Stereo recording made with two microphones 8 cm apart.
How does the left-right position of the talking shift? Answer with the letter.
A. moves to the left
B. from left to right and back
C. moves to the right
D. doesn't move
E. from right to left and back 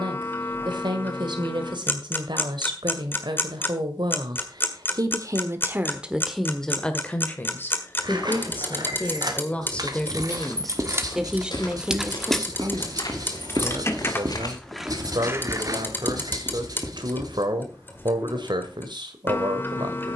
E.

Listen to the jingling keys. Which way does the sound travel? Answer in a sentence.
You can hear the jingling keys go left and come back.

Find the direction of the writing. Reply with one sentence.
You can hear the writing on the right.